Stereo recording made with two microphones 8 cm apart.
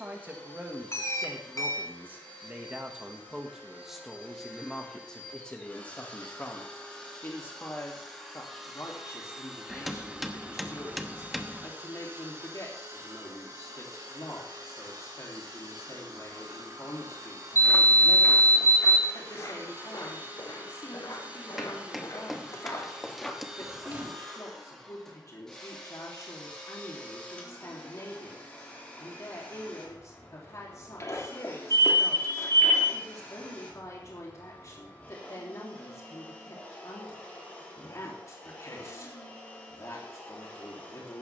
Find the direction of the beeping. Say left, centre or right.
left.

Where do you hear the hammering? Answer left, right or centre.
centre.